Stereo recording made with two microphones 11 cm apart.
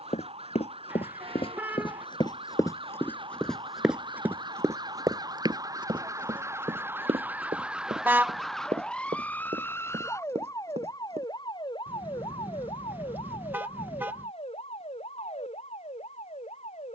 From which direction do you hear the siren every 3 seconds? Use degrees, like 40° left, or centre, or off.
60° right, 40° right, 10° right, 30° left, 50° left, 60° left.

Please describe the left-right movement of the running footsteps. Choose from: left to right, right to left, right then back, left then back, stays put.
left to right.